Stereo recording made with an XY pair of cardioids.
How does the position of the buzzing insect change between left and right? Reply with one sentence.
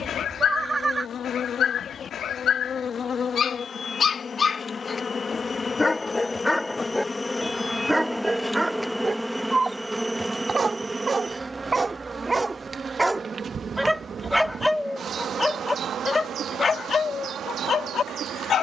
In this clip you hear the buzzing insect move from left to right.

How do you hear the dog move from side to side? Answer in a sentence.
You can hear the dog move from left to right and back again.